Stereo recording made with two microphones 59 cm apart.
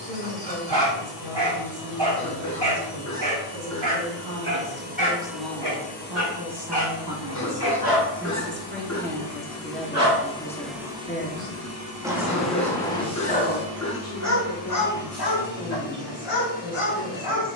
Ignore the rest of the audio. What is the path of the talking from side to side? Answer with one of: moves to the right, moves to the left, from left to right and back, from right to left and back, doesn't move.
moves to the left.